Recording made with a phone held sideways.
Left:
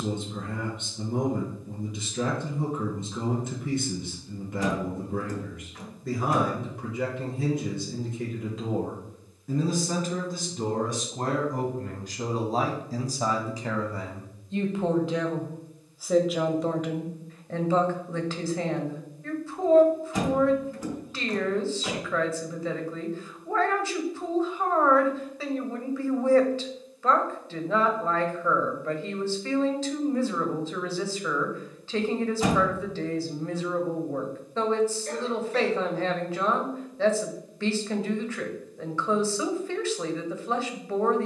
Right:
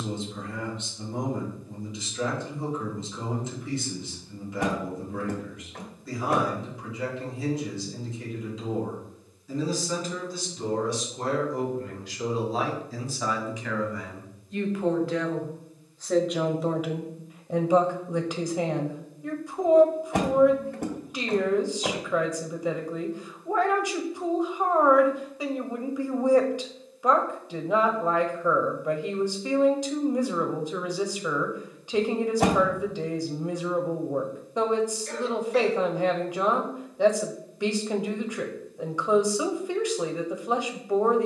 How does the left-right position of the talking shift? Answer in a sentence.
You can hear the talking move to the right.